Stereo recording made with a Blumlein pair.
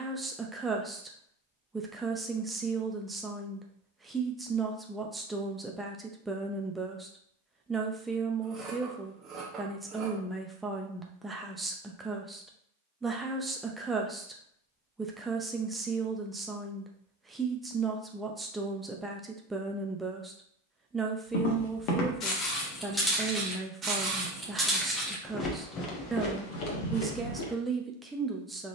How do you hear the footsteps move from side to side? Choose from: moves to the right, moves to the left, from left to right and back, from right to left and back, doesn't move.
from left to right and back.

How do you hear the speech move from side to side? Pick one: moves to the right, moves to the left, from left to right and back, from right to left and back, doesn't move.
doesn't move.